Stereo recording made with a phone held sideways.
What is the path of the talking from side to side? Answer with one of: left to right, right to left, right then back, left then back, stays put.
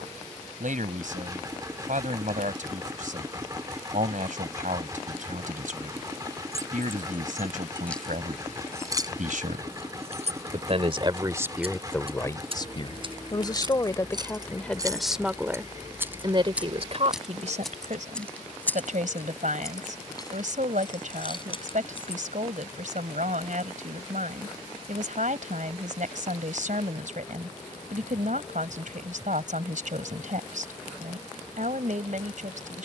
left then back.